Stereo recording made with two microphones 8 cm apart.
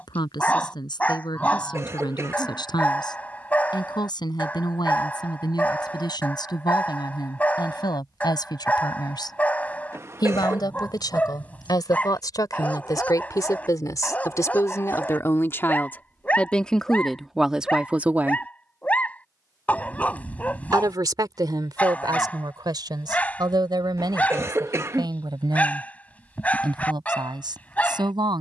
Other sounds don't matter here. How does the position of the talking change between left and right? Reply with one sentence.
In this clip you hear the talking travel towards the right.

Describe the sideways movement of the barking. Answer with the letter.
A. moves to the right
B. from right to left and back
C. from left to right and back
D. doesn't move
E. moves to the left
D.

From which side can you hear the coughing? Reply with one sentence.
You can hear the coughing on the right.